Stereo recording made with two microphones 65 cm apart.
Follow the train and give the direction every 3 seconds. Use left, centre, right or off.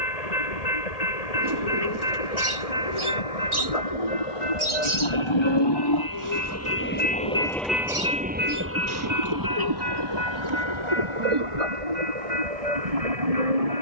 left, left, centre, right, right.